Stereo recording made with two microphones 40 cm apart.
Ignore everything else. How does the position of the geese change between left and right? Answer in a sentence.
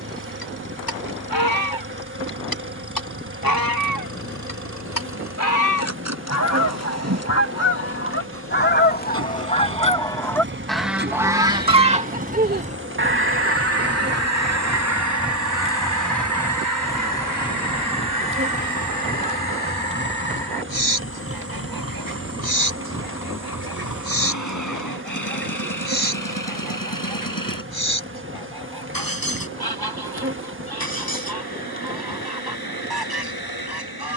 You can hear the geese move from left to right.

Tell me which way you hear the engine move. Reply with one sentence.
You can hear the engine travel towards the left.